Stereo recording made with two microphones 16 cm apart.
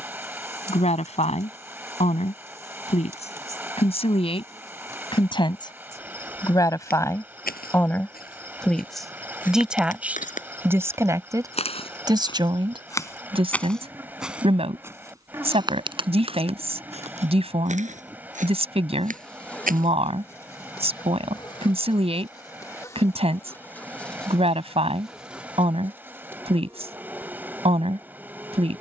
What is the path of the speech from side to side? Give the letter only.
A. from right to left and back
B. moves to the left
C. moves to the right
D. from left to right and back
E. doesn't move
C.